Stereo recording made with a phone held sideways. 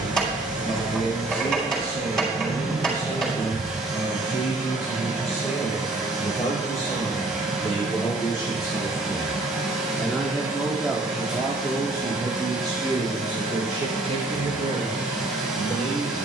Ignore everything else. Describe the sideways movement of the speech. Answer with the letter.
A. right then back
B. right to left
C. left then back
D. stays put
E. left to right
E.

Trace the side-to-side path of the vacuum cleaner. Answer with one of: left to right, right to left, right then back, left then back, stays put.
stays put.